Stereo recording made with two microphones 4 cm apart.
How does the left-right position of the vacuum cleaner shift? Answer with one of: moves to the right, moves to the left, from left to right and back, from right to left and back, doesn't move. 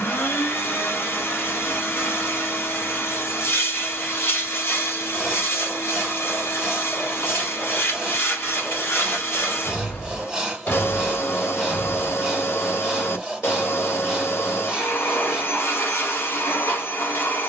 doesn't move.